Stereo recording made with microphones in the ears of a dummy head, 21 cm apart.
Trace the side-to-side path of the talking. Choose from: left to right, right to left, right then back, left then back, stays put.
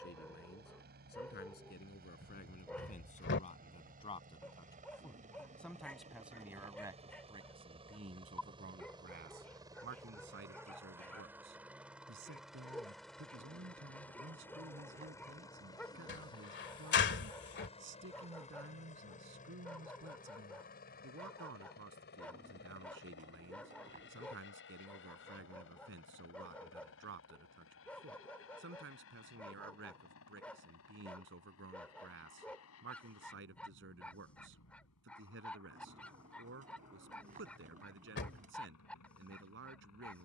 left to right.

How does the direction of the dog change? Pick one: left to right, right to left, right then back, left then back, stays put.
stays put.